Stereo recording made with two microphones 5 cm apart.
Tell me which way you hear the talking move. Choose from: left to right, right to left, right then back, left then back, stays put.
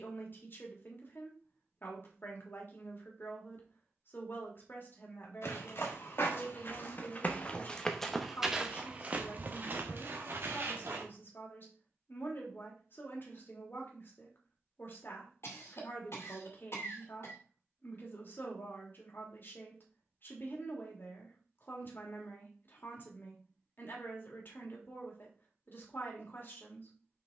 stays put.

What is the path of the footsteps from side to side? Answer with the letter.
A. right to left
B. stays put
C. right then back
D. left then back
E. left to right
E.